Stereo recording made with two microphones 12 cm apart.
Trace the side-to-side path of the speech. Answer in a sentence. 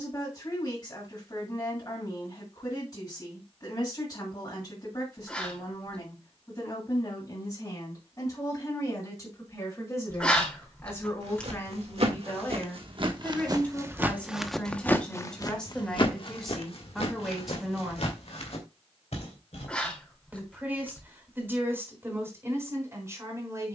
You can hear the speech move from left to right.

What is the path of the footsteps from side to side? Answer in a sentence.
You can hear the footsteps move from right to left.